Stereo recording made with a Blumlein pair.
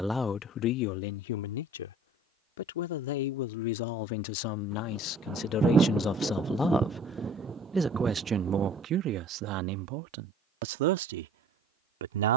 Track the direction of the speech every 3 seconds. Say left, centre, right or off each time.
left, left, centre, right.